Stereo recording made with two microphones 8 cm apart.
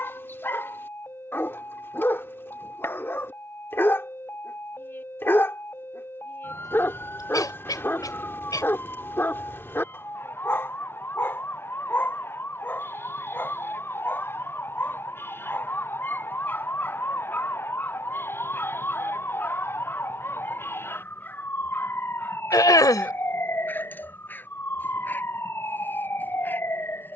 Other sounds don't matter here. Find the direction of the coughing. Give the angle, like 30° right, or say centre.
50° left.